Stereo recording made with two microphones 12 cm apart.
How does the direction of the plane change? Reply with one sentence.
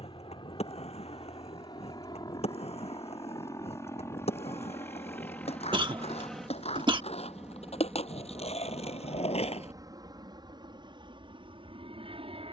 In this clip you hear the plane move to the right.